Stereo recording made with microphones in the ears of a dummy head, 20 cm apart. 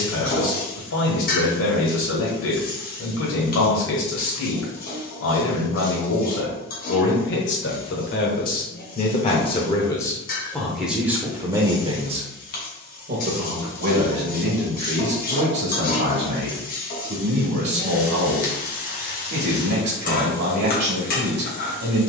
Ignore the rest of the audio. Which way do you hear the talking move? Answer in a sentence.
In this clip you hear the talking move to the right.